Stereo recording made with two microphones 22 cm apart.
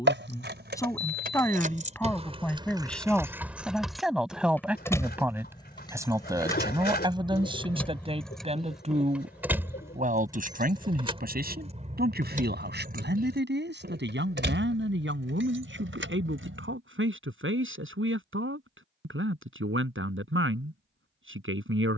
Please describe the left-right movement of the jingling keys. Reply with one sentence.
In this clip you hear the jingling keys move from right to left and back again.